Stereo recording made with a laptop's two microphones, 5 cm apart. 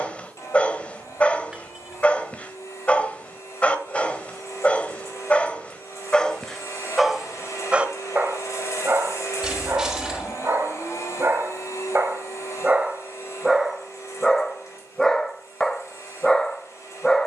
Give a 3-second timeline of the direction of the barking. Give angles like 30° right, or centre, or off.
30° left, 30° left, 10° right, 50° right, 10° right, 10° left.